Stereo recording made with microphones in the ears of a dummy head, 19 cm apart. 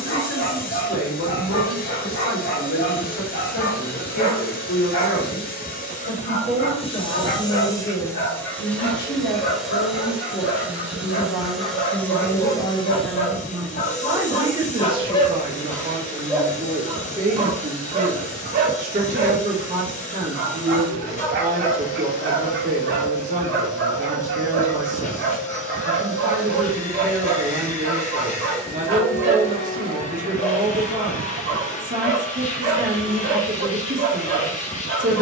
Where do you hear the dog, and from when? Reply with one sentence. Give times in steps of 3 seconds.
You can hear the dog on the left from 0 s, in the centre from 15 s and on the right from 18 s.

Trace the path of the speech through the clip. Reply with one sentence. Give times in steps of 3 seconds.
In this clip you hear the speech on the left from 0 s, in the centre from 12 s and on the right from 15 s.